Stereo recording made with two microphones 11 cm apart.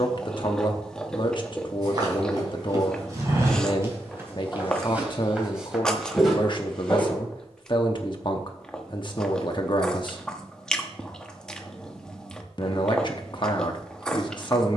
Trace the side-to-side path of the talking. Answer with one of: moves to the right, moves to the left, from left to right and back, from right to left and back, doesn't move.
doesn't move.